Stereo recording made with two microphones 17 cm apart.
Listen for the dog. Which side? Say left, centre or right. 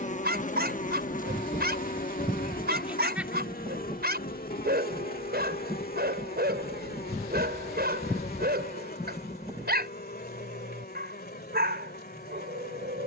right.